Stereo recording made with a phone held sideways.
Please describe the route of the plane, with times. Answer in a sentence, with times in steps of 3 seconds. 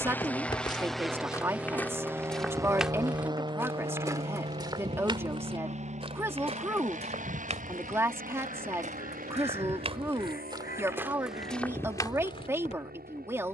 In this clip you hear the plane in the centre from 0 s and on the right from 3 s.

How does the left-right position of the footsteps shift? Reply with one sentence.
In this clip you hear the footsteps go right and come back.